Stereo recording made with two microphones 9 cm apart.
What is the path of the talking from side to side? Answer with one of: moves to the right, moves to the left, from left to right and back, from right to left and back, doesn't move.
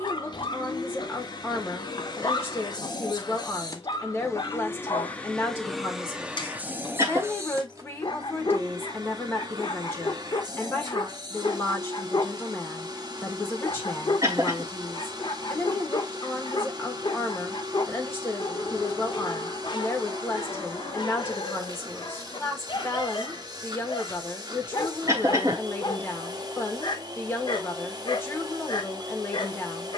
doesn't move.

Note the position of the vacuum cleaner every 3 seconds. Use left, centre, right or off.
left, left, right, right, right, right, right, right, right, right.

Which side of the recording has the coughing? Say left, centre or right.
right.